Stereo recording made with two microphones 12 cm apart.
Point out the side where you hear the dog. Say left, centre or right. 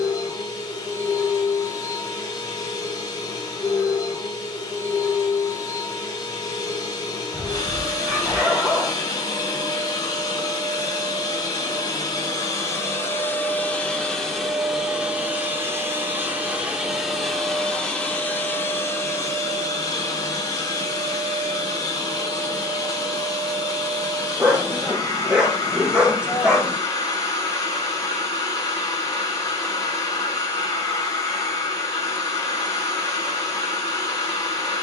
centre.